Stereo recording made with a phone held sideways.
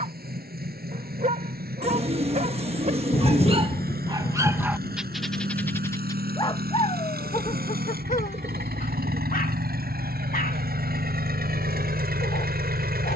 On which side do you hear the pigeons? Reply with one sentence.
You can hear the pigeons on the right.